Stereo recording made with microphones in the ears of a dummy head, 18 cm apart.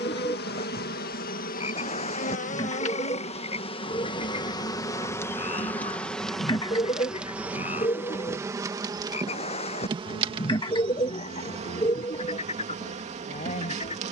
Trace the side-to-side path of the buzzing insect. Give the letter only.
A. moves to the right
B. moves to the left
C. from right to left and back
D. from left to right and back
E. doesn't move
A.